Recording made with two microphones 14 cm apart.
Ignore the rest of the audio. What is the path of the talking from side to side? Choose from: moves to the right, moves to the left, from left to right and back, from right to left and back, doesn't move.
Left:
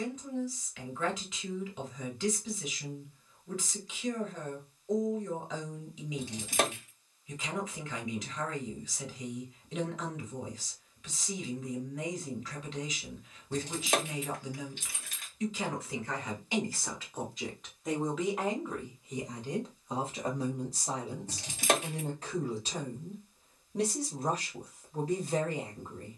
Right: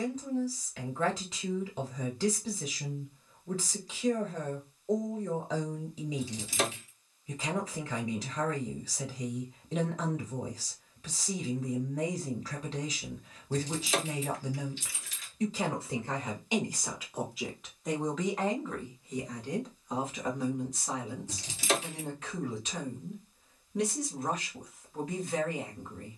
moves to the left.